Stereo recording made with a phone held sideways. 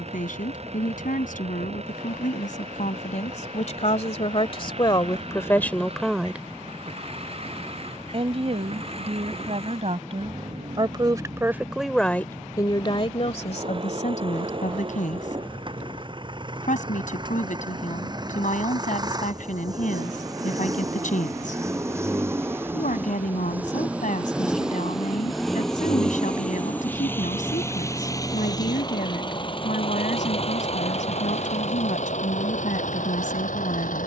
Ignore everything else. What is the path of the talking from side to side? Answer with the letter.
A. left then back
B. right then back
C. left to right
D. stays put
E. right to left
B.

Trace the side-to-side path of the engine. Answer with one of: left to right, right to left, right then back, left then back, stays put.
right to left.